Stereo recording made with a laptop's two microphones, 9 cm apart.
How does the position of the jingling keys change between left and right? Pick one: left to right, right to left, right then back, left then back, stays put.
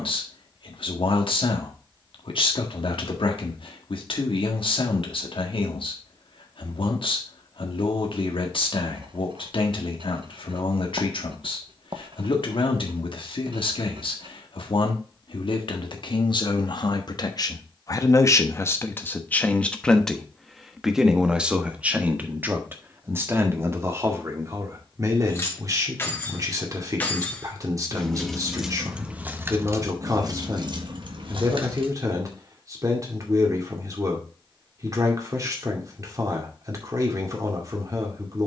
left to right.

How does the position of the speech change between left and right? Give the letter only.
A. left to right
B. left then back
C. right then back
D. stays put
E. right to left
A.